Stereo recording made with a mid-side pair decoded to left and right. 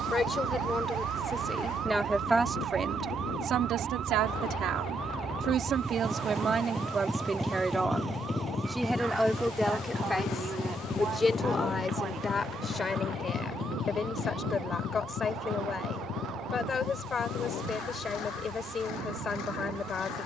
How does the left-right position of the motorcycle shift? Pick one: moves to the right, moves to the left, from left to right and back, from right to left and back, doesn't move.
moves to the left.